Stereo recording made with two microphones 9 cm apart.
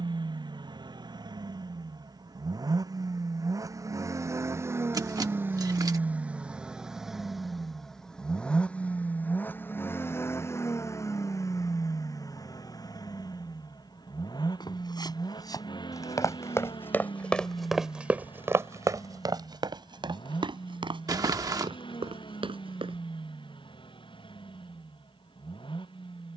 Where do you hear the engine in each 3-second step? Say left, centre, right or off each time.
right, right, centre, left, left, left, left, left, left.